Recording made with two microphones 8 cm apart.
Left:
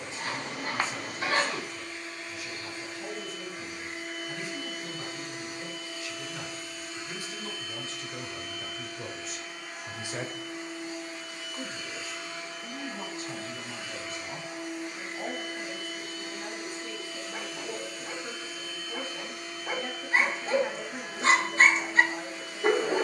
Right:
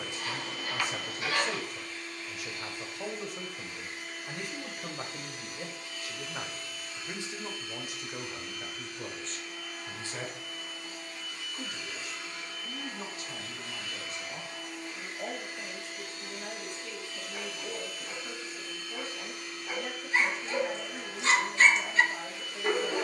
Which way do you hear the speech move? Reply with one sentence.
In this clip you hear the speech move to the left.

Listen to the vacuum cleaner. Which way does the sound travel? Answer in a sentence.
You can hear the vacuum cleaner stay put.